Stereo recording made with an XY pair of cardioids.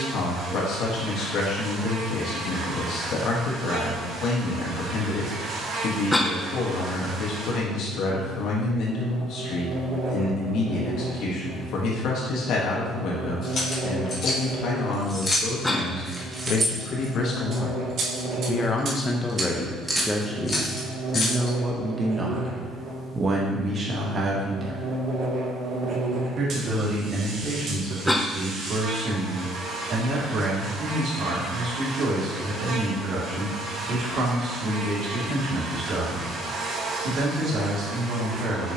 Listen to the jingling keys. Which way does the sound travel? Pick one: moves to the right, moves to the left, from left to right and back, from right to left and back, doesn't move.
from left to right and back.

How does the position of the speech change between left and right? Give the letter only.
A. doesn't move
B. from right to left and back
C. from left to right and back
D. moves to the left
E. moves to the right
E.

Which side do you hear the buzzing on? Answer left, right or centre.
right.